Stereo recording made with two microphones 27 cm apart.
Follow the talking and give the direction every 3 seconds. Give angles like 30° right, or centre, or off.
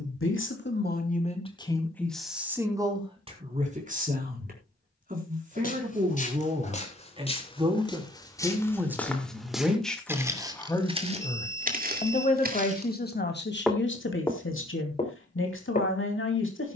20° left, 30° right, 20° right, 10° left, 40° left, 50° left.